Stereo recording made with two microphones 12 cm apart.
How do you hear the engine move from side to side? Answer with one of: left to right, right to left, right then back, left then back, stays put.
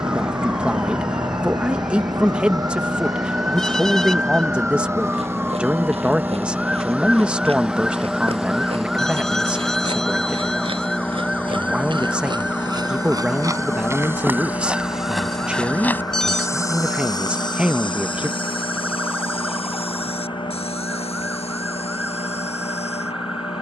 right to left.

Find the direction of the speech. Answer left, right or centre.
centre.